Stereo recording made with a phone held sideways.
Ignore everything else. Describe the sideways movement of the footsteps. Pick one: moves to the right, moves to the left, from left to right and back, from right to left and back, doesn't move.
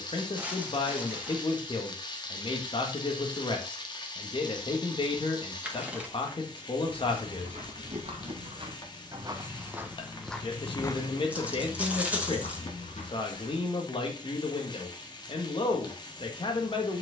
moves to the left.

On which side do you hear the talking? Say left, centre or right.
left.